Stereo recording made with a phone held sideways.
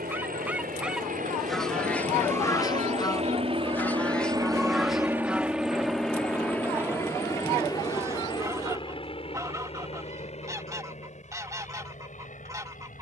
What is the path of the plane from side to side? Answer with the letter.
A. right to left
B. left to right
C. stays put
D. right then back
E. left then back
A.